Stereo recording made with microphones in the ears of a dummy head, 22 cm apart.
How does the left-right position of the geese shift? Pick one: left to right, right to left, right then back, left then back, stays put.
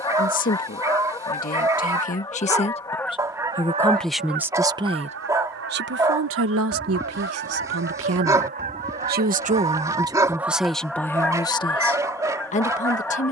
right then back.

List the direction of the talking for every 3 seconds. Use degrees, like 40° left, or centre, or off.
40° left, 10° right, 70° right, 10° right, 30° left.